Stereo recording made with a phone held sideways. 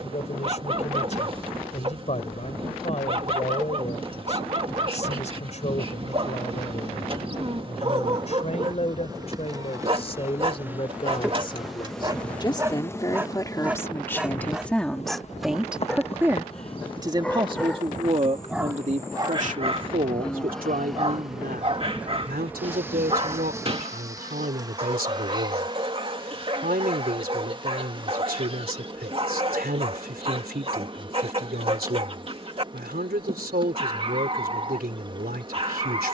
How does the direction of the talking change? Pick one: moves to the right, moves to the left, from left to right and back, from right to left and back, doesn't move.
moves to the right.